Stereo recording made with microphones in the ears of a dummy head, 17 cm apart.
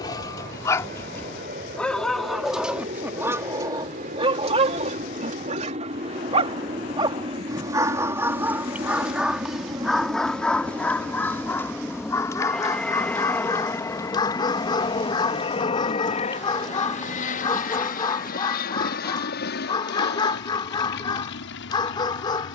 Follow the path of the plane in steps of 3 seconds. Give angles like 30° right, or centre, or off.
50° right, 40° right, 30° right, 10° right, 10° left, 40° left, 50° left, 60° left.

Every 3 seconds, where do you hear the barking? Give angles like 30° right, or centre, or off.
10° left, 30° right, 20° right, centre, 20° left, 20° left, 20° left, 20° left.